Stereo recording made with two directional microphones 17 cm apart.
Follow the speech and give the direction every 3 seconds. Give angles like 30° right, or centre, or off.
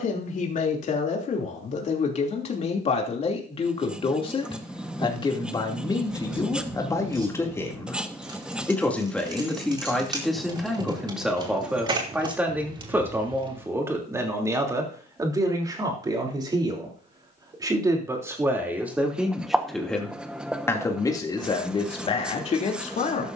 40° left, 30° left, 20° left, centre, 10° right, 20° right, centre, 30° left.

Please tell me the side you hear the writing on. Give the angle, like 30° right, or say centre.
10° right.